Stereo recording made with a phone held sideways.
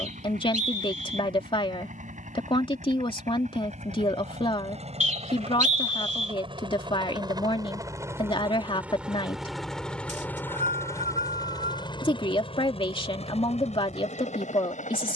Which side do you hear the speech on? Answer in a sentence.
You can hear the speech on the left.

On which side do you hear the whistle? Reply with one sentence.
In this clip you hear the whistle on the right.